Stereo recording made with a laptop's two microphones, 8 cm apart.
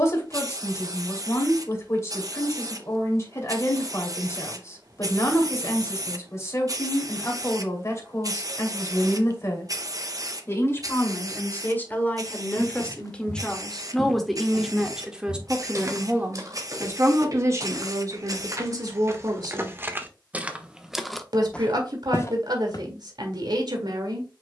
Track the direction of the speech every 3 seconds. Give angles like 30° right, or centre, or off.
40° left, 40° left, 40° left, 30° left, 10° left, 30° right, 50° right, 60° right.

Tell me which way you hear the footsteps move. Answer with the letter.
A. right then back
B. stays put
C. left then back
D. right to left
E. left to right
A.